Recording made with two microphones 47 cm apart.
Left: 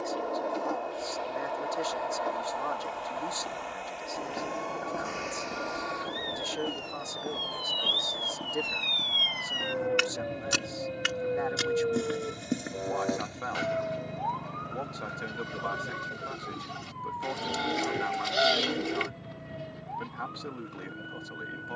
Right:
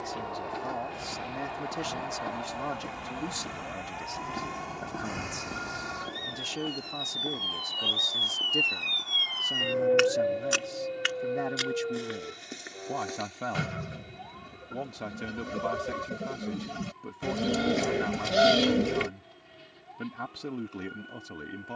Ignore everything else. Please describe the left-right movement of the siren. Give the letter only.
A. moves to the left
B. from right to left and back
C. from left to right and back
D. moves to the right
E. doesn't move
A.